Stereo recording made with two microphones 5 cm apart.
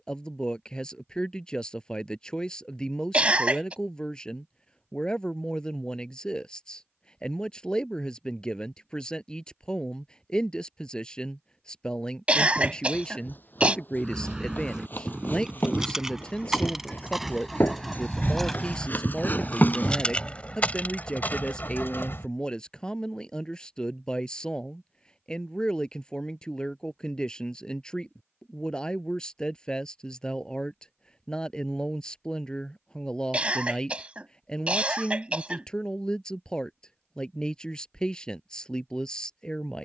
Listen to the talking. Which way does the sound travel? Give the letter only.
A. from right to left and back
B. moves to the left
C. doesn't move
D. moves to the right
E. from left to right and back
C.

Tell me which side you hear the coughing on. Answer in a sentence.
You can hear the coughing on the right.